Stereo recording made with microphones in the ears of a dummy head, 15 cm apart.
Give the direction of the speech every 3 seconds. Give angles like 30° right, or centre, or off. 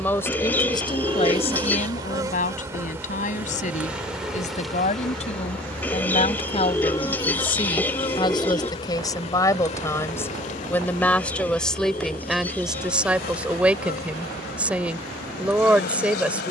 30° left, 40° left, 30° left, 10° left, 10° right, 10° right.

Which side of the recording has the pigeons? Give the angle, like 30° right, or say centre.
10° left.